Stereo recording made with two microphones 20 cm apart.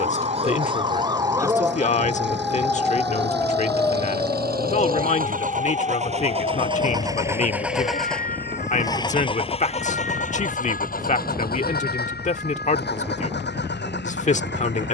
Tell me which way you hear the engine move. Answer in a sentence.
In this clip you hear the engine go from the right side to the left.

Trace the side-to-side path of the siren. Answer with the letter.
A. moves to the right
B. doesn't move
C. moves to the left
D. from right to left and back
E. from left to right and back
C.